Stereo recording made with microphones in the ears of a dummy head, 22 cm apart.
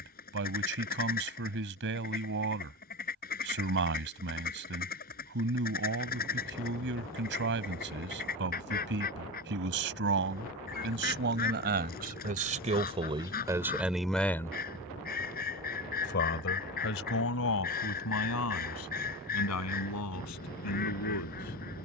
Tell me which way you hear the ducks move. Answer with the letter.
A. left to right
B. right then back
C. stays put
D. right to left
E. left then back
C.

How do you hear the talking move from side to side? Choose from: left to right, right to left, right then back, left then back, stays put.
right to left.